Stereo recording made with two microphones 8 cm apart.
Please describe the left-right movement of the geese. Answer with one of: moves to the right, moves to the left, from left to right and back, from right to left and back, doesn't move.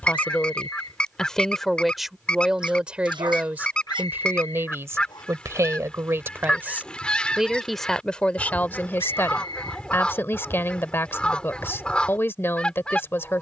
doesn't move.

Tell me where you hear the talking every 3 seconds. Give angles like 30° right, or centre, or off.
centre, 30° right, centre, 30° left, 30° left.